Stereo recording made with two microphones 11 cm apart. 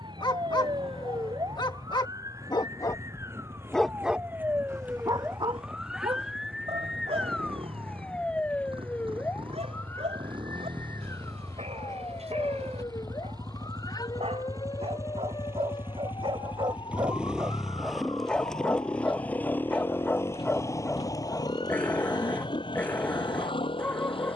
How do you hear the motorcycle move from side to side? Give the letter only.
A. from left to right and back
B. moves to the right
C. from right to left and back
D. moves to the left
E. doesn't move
D.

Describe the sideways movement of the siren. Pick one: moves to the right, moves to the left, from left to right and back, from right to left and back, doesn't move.
moves to the left.